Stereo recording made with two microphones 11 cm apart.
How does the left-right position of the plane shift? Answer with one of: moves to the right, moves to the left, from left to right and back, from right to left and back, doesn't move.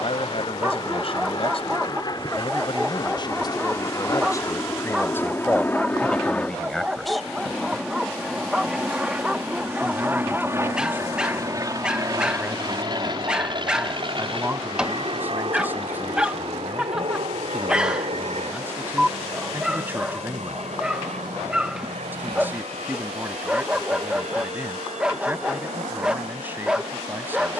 moves to the right.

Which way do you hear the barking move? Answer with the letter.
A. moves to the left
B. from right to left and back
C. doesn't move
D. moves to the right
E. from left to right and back
C.